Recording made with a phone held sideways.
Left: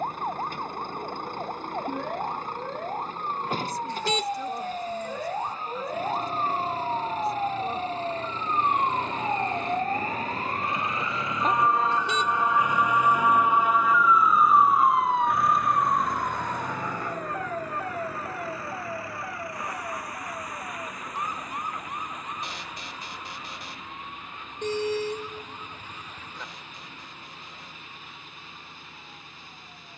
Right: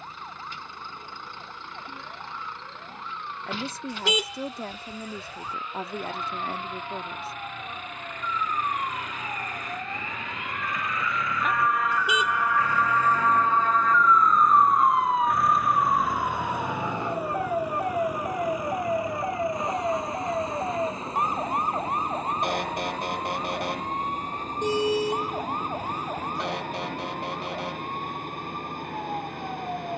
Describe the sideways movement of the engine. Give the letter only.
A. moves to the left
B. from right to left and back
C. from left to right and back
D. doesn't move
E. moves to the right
E.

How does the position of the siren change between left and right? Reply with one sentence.
In this clip you hear the siren move to the right.